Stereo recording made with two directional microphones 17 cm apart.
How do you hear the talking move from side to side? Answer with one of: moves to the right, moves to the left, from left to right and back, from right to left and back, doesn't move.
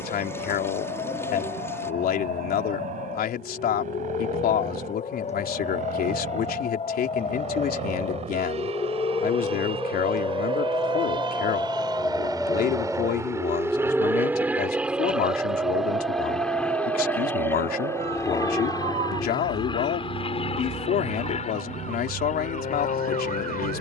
doesn't move.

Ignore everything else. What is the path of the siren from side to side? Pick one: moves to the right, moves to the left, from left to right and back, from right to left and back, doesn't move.
moves to the right.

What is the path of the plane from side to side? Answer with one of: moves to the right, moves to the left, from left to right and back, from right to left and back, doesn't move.
moves to the left.